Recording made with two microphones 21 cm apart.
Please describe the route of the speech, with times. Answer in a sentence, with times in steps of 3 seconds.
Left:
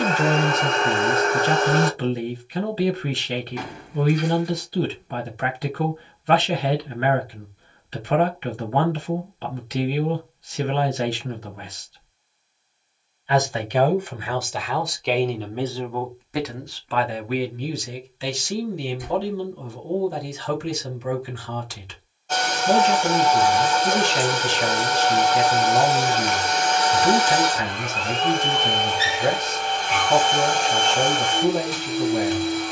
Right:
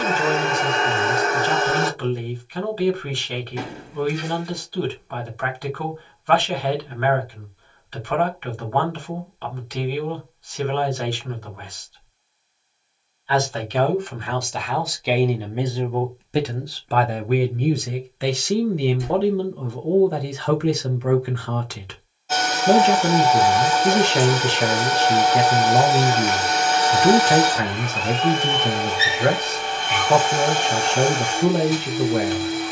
You can hear the speech on the left from 0 s, in the centre from 12 s and on the right from 15 s.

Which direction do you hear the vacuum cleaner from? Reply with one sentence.
You can hear the vacuum cleaner in the centre.